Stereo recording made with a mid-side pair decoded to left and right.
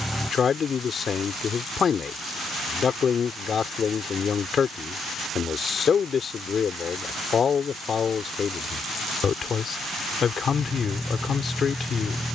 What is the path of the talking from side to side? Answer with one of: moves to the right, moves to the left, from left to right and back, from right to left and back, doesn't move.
doesn't move.